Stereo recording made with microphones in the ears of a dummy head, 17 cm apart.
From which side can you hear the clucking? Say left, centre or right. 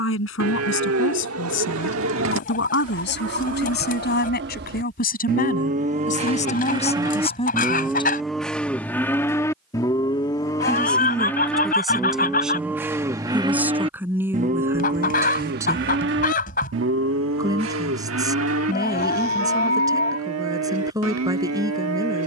left.